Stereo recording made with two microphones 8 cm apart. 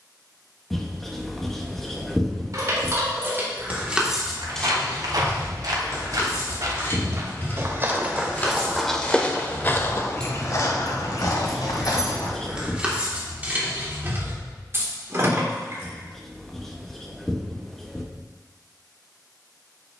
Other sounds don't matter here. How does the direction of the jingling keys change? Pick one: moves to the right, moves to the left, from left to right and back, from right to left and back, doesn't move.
from right to left and back.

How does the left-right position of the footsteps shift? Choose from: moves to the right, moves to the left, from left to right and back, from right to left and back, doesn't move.
moves to the left.